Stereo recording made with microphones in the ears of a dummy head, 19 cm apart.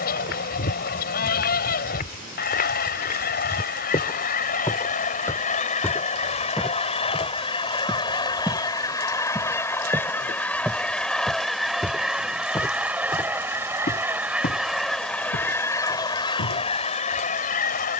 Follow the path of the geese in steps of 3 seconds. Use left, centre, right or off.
left, left, left, centre, centre, left.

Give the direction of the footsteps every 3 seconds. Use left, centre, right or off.
left, left, centre, centre, left, left.